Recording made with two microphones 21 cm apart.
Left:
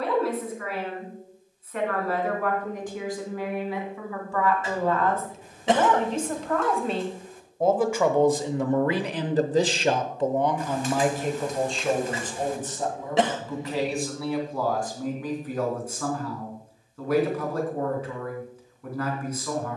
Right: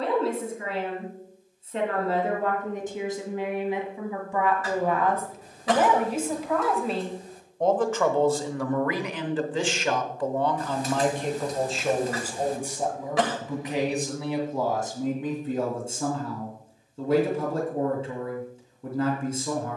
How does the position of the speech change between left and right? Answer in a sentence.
In this clip you hear the speech move from right to left and back again.